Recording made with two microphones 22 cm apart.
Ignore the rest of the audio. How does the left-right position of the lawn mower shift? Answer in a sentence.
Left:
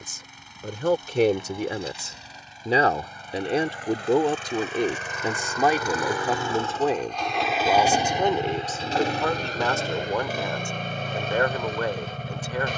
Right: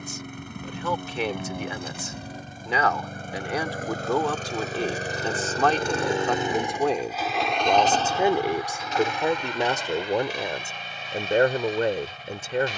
In this clip you hear the lawn mower travel towards the left.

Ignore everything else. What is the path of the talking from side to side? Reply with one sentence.
In this clip you hear the talking travel towards the right.